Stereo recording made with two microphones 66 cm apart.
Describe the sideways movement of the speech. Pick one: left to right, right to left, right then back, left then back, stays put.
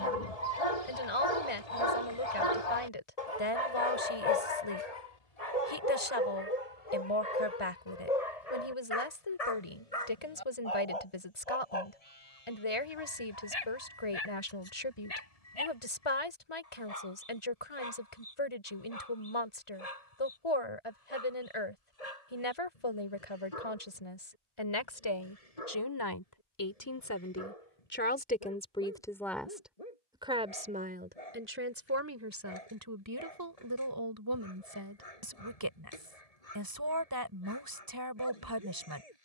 left to right.